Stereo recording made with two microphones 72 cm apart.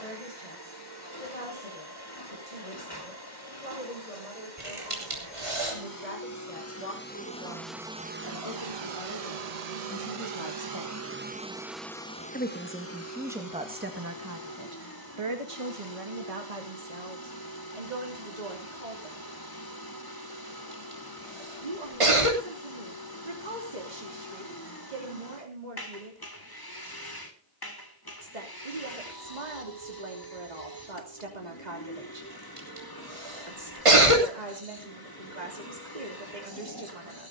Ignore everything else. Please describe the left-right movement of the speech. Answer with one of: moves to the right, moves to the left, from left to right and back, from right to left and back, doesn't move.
moves to the right.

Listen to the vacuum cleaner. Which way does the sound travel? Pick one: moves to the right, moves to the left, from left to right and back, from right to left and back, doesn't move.
from left to right and back.